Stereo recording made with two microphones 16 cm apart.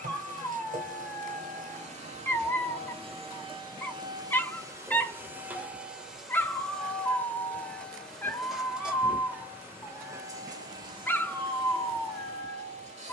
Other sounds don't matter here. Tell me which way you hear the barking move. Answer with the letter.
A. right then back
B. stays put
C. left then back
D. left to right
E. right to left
B.